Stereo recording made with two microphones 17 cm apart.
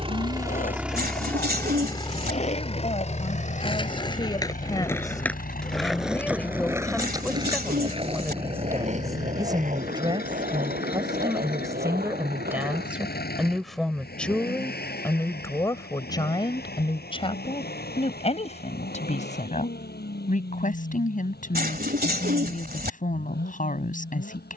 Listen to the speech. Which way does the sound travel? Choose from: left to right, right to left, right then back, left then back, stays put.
right then back.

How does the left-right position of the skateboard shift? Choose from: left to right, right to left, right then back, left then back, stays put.
left to right.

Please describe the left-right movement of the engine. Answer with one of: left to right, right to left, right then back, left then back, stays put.
right to left.